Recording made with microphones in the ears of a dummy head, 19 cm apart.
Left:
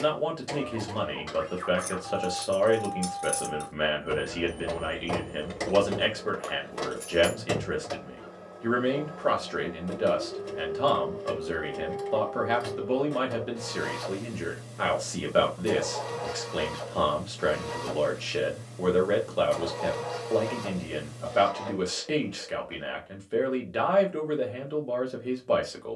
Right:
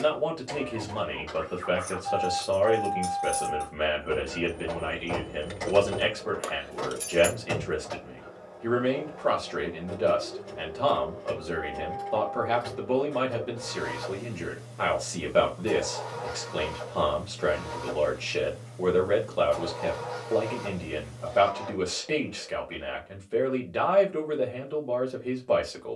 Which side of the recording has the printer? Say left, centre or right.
left.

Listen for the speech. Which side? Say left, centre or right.
centre.